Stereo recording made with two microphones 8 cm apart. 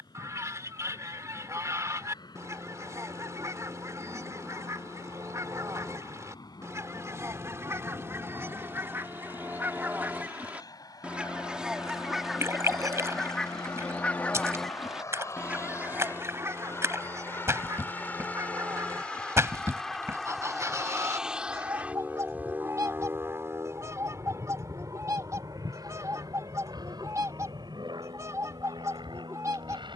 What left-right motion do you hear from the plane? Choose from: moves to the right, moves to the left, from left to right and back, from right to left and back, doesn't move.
moves to the right.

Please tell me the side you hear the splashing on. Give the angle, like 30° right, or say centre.
40° right.